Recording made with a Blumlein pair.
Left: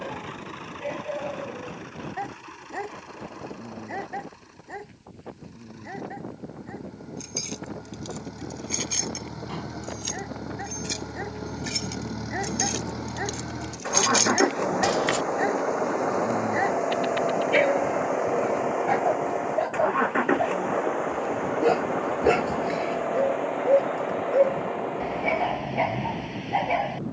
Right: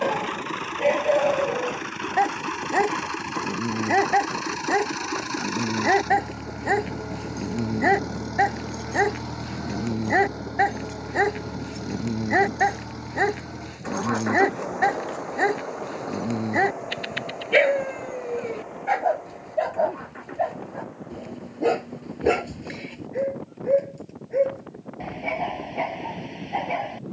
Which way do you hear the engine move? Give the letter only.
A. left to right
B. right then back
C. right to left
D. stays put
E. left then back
C.